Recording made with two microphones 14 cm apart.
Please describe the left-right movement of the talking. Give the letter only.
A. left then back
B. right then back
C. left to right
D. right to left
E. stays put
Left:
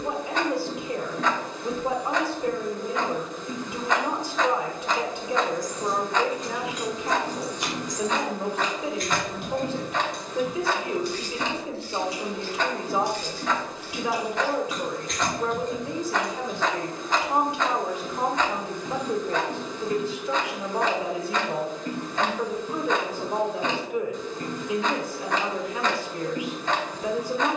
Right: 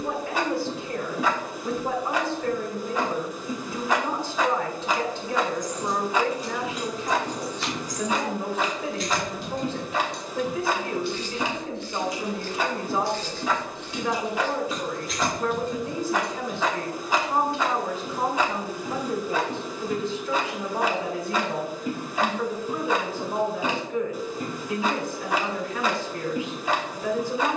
E.